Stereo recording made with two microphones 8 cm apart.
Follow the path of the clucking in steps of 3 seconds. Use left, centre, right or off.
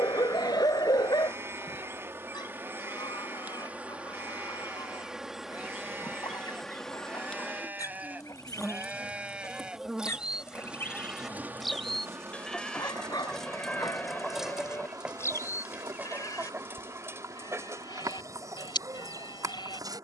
left, left, left, left, centre, right, right.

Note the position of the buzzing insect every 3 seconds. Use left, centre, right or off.
right, centre, centre, centre, right, right, right.